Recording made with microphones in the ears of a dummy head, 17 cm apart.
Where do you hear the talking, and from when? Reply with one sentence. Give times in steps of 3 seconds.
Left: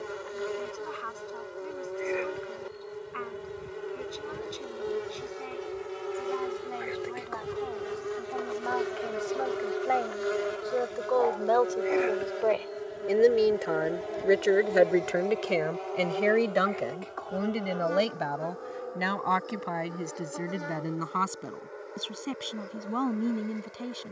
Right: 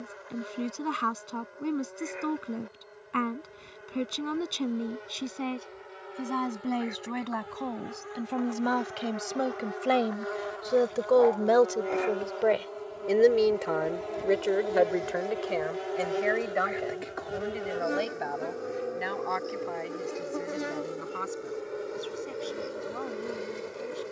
In this clip you hear the talking on the right from 0 s, in the centre from 12 s and on the left from 15 s.